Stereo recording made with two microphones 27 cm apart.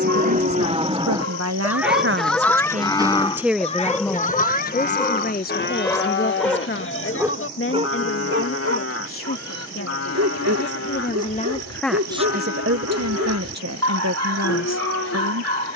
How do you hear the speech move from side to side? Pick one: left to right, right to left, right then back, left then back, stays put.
left then back.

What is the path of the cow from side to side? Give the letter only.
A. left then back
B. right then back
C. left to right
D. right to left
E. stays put
D.